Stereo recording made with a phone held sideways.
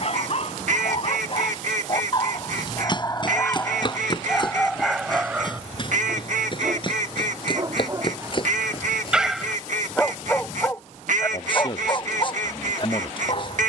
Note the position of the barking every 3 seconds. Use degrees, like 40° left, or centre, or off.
40° left, 10° left, 30° right, 10° left, 40° left.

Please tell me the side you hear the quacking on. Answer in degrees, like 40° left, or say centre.
70° right.